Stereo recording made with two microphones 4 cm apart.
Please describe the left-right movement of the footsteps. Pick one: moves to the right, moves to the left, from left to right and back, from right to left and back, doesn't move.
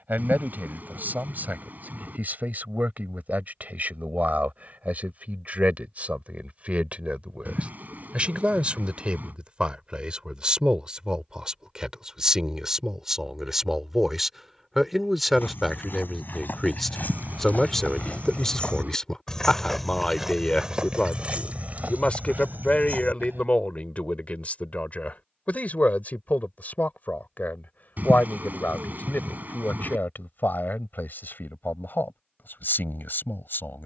moves to the right.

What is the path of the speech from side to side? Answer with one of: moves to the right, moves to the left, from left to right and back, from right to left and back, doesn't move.
moves to the left.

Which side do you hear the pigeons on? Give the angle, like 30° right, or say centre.
50° right.